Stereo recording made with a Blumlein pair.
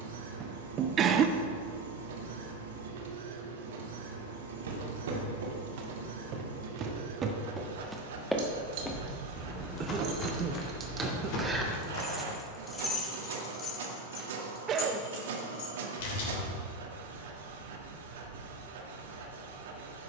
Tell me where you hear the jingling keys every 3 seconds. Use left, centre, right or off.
off, off, right, right, left, left, off.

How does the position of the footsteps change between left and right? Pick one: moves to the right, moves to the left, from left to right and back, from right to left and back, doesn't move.
moves to the left.